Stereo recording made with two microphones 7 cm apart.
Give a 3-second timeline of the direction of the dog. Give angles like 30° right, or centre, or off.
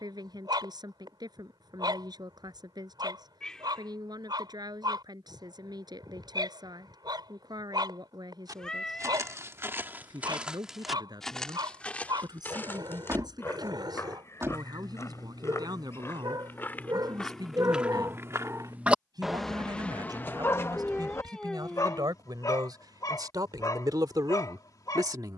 80° right, 80° right, 80° right, 80° right, 80° right, 70° right, centre, 50° left, 60° left.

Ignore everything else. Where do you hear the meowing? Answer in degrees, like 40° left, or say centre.
10° left.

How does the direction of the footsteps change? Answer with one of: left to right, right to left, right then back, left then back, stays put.
left then back.